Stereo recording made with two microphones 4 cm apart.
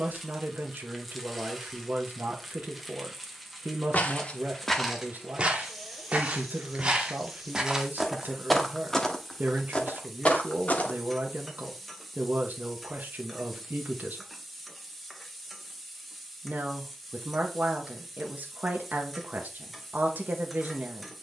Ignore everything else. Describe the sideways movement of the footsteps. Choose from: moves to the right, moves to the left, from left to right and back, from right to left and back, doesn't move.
from left to right and back.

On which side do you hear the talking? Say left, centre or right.
right.